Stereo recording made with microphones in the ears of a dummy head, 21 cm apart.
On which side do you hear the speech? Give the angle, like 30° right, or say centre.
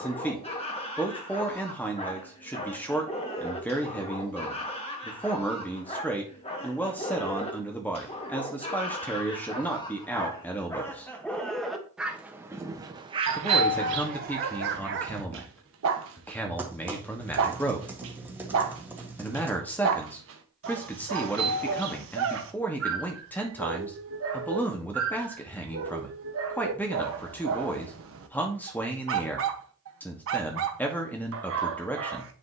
10° left.